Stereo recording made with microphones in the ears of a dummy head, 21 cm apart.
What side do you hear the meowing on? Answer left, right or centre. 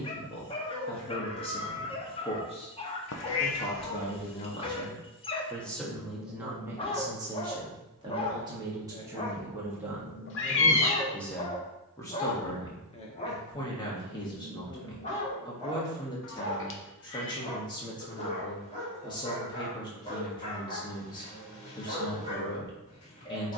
left.